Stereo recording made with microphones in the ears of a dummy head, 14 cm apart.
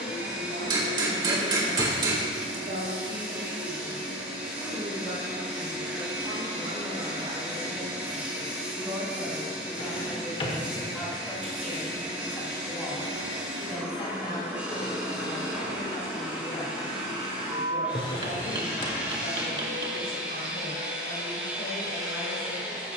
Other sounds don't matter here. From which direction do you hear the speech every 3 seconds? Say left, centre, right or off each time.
right, right, right, centre, left, left, left, left.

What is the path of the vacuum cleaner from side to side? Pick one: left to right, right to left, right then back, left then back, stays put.
stays put.